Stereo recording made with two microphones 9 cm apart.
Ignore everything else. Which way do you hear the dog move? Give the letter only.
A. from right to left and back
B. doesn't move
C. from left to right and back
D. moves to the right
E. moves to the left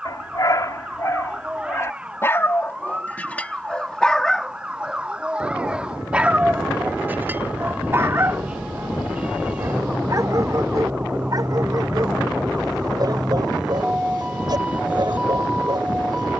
D.